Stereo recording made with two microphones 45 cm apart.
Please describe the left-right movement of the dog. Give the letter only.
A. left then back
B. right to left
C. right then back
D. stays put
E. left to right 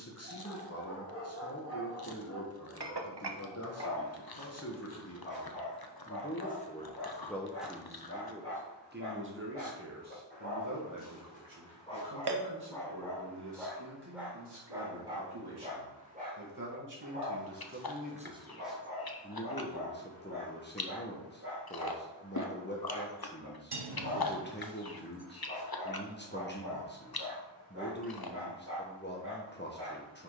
E.